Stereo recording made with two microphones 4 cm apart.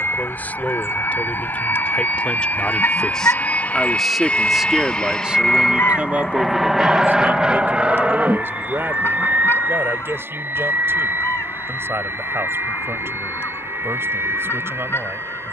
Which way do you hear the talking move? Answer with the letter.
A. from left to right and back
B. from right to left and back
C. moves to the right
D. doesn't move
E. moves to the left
C.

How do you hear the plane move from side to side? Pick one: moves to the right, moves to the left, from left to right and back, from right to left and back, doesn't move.
moves to the right.